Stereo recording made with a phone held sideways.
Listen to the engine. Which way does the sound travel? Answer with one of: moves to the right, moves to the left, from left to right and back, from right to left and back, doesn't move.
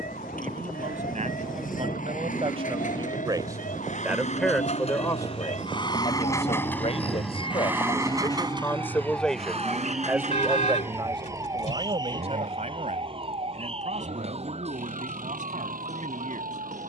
moves to the right.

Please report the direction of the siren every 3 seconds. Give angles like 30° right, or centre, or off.
80° left, 70° left, 40° left, 10° right, 40° right, 50° right.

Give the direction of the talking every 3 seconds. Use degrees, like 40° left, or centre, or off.
50° right, centre, 40° left, 20° right, 60° right, 60° right.